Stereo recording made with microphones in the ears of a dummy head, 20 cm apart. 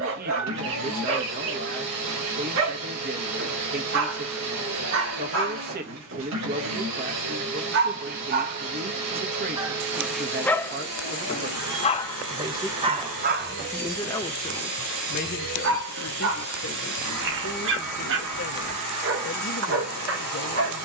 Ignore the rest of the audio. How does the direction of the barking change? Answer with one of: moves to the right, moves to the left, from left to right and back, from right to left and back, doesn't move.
from right to left and back.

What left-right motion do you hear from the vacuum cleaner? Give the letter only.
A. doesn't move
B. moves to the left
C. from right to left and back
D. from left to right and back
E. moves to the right
A.